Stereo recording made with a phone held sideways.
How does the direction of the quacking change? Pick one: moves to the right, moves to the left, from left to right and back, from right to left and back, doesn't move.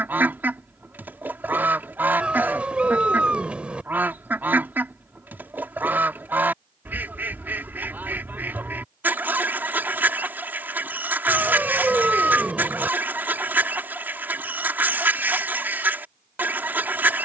doesn't move.